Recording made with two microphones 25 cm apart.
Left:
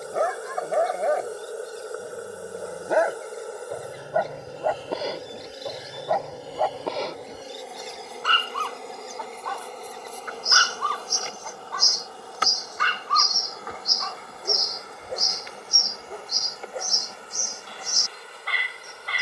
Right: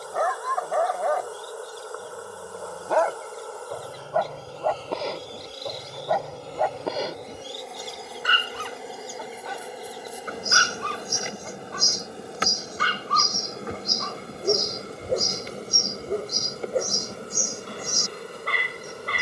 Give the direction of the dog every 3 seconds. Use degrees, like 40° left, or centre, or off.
20° left, 10° left, 10° right, 20° right, 40° right, 50° right, 50° right.